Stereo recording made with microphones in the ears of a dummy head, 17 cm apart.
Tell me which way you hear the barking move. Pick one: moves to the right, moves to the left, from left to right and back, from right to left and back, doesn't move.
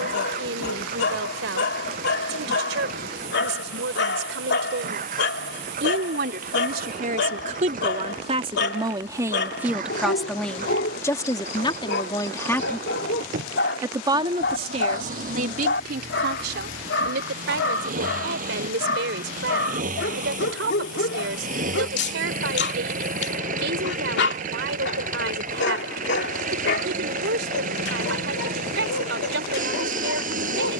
doesn't move.